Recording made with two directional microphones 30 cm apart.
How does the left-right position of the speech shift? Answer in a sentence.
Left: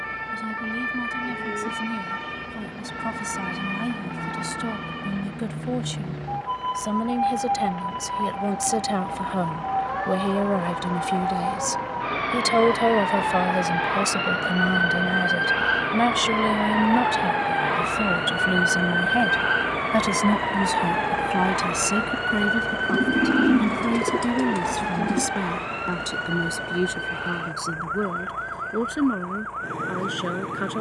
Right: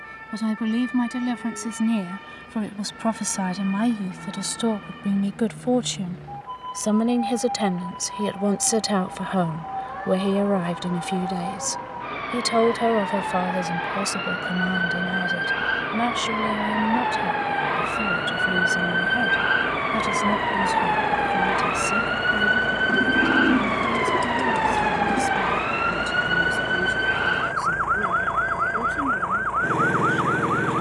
In this clip you hear the speech move from right to left.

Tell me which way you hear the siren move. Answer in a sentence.
In this clip you hear the siren move from left to right.